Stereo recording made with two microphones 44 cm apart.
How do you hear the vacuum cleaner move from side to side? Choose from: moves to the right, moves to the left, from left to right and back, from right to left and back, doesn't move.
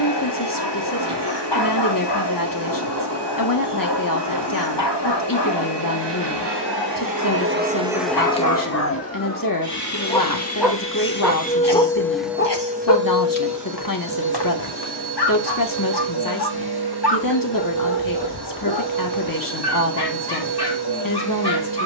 from right to left and back.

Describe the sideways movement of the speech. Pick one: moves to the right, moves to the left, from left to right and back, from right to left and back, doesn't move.
doesn't move.